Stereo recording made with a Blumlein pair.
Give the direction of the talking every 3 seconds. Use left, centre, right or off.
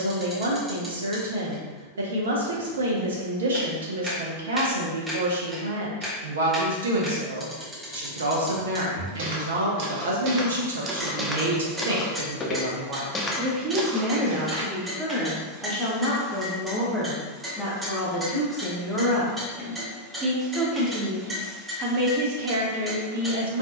right, right, right, right, right, centre, centre, right.